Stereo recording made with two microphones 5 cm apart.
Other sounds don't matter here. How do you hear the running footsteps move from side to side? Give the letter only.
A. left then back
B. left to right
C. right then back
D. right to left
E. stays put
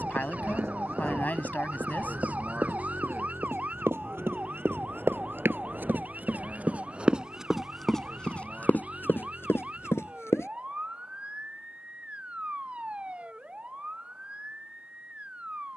D.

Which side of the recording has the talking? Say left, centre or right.
left.